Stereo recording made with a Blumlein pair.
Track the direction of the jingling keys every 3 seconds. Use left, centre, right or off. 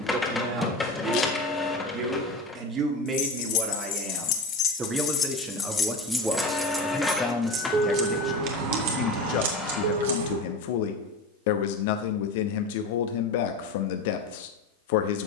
off, left, right, right, off.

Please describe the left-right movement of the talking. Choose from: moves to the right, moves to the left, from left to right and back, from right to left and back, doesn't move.
moves to the left.